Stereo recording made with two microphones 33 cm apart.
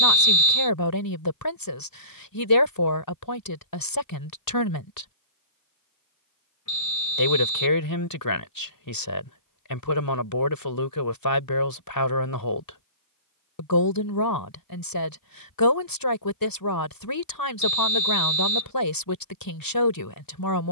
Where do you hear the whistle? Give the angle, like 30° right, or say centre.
60° left.